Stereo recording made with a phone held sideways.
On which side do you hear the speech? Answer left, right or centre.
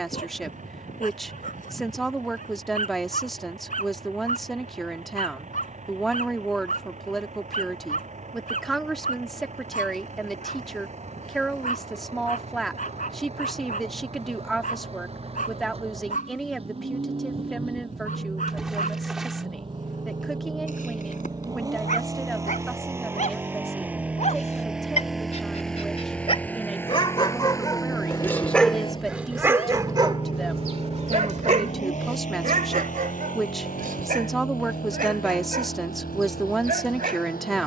centre.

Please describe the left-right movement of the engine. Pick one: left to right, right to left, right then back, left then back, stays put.
right to left.